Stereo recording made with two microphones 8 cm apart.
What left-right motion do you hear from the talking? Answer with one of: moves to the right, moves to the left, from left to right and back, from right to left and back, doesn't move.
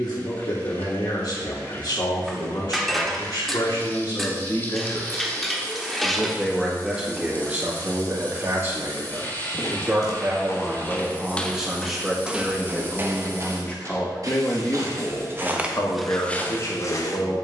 from left to right and back.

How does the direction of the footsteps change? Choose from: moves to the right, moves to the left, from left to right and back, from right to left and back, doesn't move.
from left to right and back.